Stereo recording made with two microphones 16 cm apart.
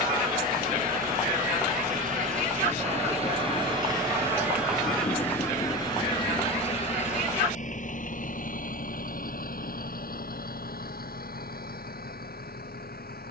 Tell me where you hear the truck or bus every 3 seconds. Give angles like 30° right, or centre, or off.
60° right, 10° right, 50° left, 70° left, 70° left.